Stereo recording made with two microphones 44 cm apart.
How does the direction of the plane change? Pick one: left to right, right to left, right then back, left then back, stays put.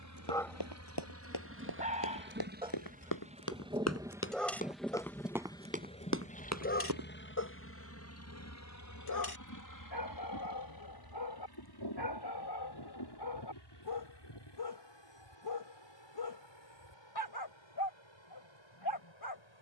right to left.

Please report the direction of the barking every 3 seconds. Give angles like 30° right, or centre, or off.
10° right, 10° left, 40° left, 60° left, 60° left, 60° left, 60° left.